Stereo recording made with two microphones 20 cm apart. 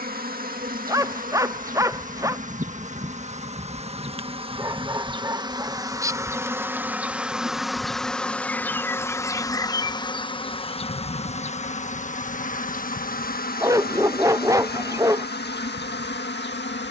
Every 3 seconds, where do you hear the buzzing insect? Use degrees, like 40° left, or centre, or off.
40° right, 30° right, centre, 30° left, 50° left, 60° left.